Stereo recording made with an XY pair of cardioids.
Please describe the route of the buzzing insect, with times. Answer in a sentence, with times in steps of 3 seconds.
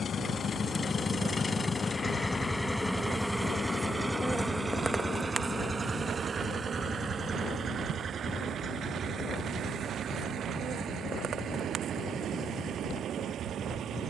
You can hear the buzzing insect on the left from 0 s, in the centre from 3 s and on the right from 6 s.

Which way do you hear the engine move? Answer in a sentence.
You can hear the engine go from the left side to the right.